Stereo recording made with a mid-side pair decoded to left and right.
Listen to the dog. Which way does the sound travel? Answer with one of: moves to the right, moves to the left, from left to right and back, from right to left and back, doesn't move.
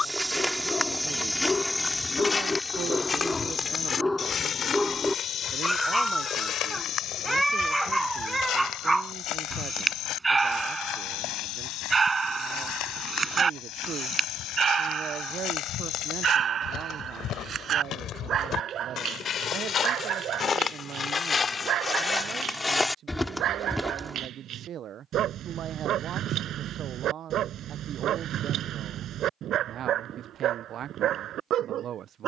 moves to the right.